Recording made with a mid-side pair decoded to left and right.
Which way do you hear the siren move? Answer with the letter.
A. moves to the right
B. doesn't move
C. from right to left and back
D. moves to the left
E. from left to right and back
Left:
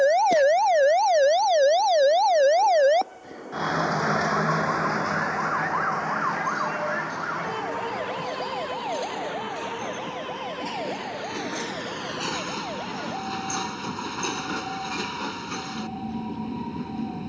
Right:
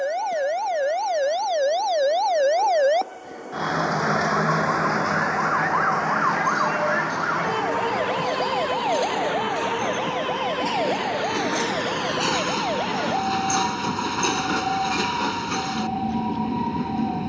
A.